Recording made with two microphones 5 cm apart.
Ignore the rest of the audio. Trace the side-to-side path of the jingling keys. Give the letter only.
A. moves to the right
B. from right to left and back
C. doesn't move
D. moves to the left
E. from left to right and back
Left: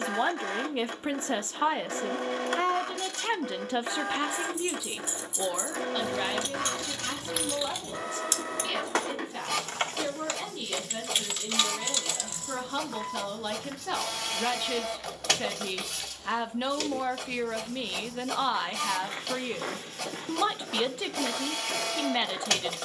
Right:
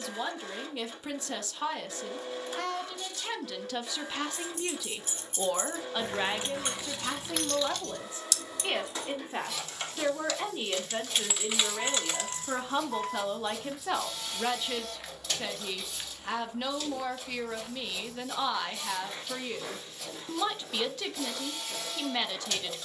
B.